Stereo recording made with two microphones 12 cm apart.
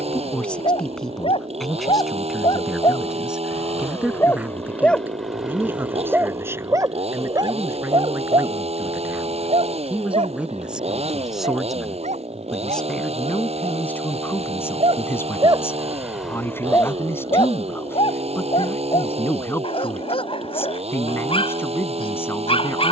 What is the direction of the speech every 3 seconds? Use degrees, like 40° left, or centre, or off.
centre, 10° right, 20° right, 10° right, 10° left, 20° left, 20° left, 20° left.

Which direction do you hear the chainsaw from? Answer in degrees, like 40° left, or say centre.
60° right.